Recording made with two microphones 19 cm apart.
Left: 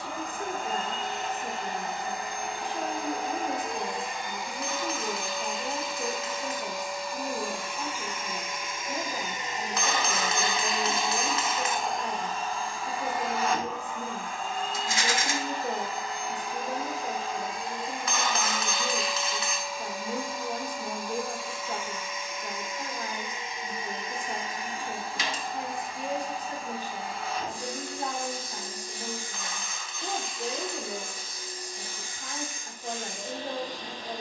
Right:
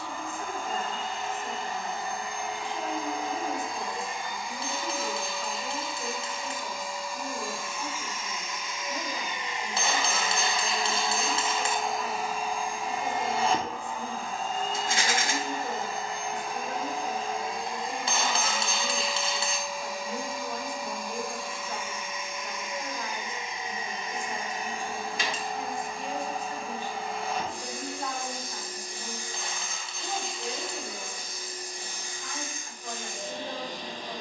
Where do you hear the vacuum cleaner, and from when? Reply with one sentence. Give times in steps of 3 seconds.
In this clip you hear the vacuum cleaner on the left from 0 s and on the right from 12 s.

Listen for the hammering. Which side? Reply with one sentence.
You can hear the hammering on the right.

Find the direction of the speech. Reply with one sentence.
In this clip you hear the speech on the left.